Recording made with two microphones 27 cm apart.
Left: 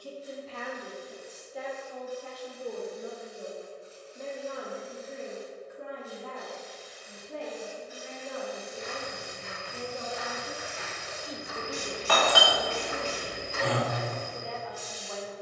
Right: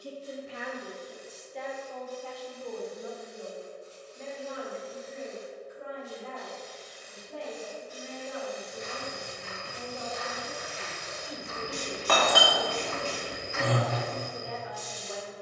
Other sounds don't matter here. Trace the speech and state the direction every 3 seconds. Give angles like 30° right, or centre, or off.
centre, 50° left, 60° left, 30° left, 10° right.